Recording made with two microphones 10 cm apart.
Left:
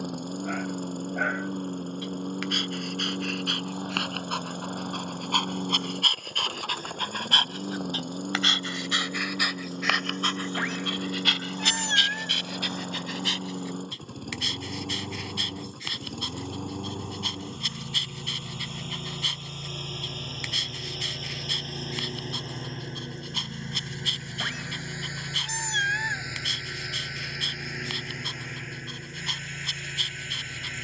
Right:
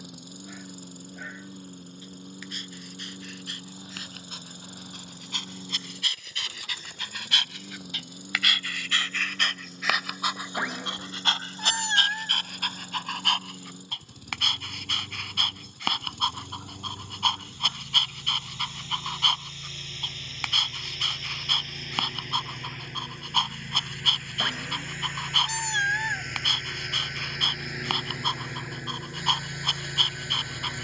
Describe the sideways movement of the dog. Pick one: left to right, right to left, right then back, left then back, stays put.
left to right.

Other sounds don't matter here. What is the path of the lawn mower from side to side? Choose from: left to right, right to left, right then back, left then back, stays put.
left to right.